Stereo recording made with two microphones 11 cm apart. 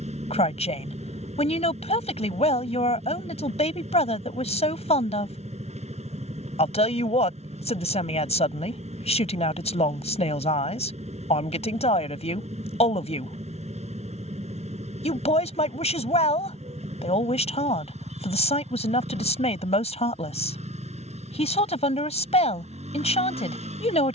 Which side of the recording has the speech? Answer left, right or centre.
left.